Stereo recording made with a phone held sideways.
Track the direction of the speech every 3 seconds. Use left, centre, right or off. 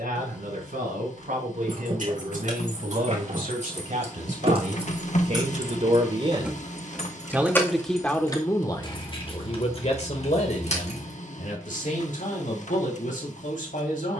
right, right, centre, left, left.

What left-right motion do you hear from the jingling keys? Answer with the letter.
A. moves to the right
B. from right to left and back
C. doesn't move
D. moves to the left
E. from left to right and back
D.